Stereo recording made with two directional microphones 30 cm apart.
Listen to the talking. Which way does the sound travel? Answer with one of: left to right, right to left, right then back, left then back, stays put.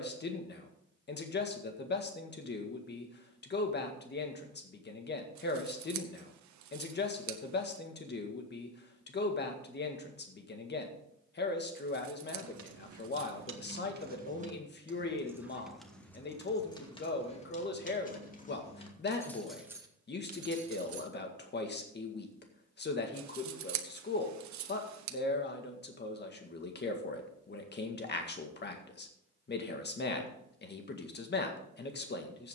stays put.